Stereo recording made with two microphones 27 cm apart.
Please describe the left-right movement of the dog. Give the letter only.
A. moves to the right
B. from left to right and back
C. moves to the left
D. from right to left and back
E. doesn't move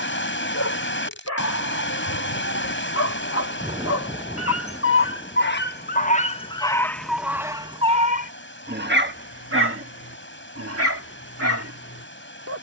A.